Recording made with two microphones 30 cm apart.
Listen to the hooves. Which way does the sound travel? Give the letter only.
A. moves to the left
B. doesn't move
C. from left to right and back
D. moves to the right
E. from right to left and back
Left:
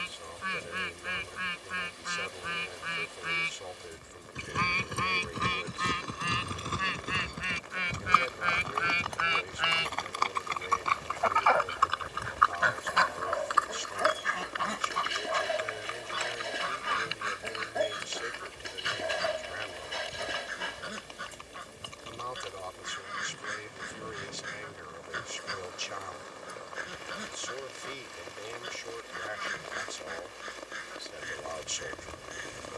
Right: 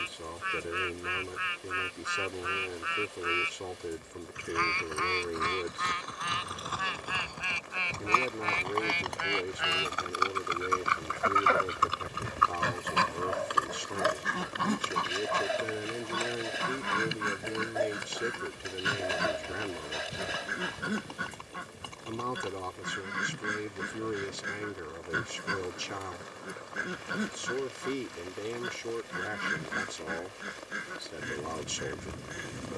D.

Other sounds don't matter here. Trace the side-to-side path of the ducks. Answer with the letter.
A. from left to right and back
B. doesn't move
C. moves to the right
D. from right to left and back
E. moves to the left
C.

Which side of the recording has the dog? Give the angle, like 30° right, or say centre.
centre.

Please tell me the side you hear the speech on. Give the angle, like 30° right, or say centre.
70° right.